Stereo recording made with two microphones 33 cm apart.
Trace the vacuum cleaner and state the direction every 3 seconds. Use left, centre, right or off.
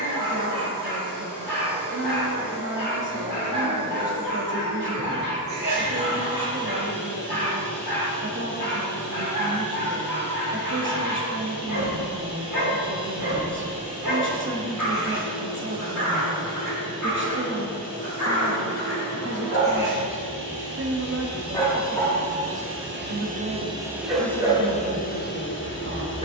right, right, right, right, right, right, right, right, left.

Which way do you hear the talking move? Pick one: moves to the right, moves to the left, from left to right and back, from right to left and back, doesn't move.
doesn't move.